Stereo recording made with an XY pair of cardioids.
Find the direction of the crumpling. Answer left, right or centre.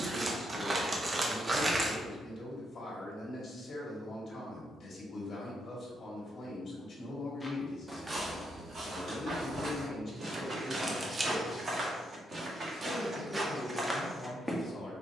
right.